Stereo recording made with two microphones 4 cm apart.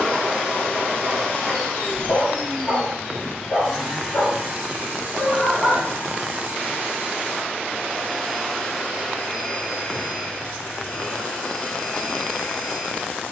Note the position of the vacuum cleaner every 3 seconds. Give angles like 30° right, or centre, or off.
30° left, 20° right, 10° right, 20° left, 30° left.